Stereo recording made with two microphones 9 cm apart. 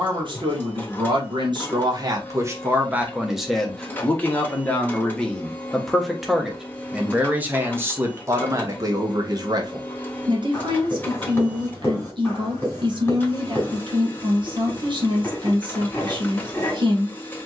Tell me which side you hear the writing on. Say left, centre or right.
left.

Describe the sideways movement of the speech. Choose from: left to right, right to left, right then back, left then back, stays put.
left then back.